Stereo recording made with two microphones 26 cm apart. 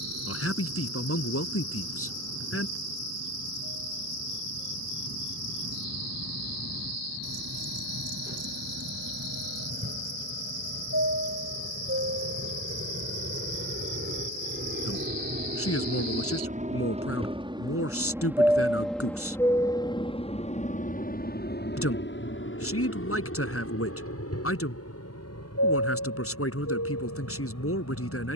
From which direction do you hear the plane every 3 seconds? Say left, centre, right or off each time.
right, right, right, right, right, right, centre, left, left, left.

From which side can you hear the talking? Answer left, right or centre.
left.